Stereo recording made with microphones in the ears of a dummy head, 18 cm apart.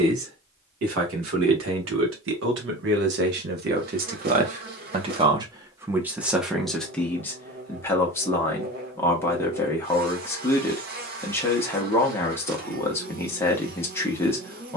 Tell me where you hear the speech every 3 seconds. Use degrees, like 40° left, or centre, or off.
70° right, 40° right, 10° left, 10° left, 10° left.